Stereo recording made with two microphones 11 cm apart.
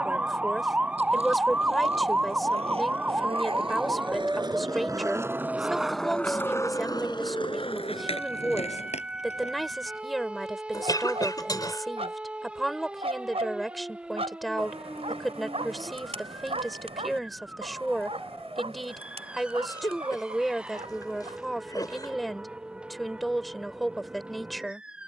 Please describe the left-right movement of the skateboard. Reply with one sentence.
You can hear the skateboard go from the right side to the left.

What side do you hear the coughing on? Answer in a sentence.
You can hear the coughing on the left.